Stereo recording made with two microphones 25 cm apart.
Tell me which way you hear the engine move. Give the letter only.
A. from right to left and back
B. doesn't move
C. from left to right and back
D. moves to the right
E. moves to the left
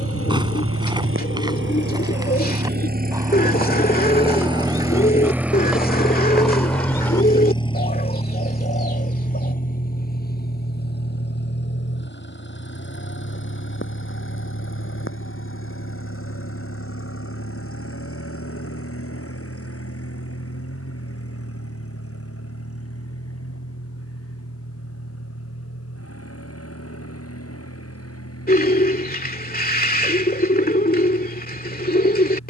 E.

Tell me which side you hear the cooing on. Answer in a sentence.
You can hear the cooing on the left.